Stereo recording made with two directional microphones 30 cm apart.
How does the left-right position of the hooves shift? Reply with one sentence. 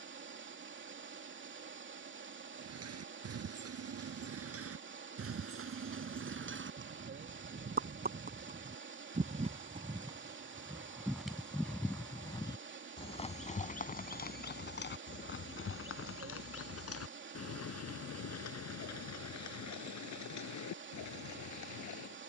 You can hear the hooves move to the left.